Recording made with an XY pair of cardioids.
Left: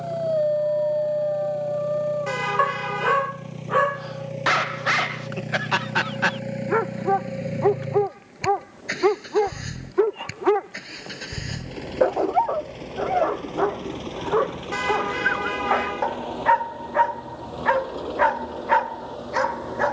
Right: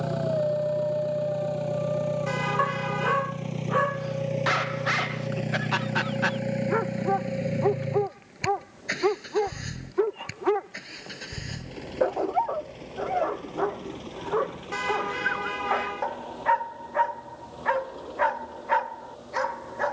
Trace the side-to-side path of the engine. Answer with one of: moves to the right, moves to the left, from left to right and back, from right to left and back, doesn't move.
moves to the left.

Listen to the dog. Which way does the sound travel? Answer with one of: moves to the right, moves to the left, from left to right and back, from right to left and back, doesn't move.
doesn't move.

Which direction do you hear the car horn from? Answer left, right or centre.
left.